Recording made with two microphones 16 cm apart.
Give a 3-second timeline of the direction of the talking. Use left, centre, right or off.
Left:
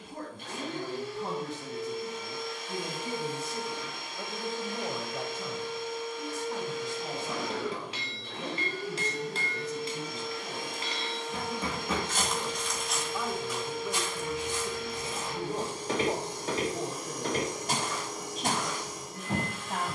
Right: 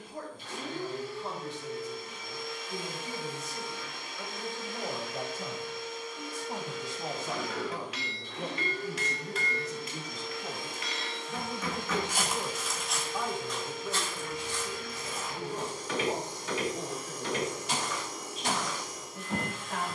left, centre, right, right, centre, left, left.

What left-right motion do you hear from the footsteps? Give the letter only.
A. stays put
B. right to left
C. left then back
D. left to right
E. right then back
B.